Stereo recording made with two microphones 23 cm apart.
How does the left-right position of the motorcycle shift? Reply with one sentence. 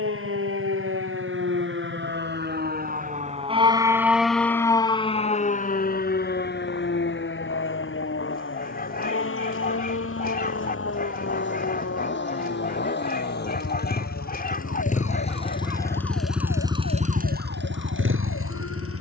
In this clip you hear the motorcycle go from the left side to the right.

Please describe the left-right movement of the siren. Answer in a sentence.
In this clip you hear the siren go from the right side to the left.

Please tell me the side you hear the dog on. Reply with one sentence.
In this clip you hear the dog on the left.